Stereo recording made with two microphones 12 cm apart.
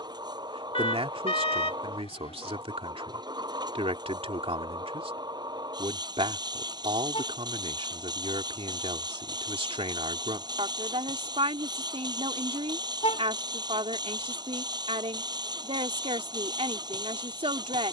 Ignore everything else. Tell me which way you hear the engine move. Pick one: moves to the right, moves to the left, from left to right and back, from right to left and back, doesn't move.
doesn't move.